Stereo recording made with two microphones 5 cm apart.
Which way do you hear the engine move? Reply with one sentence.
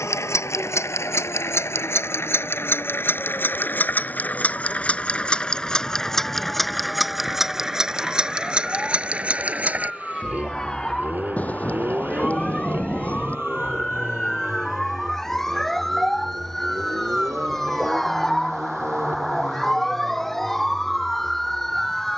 You can hear the engine move to the right.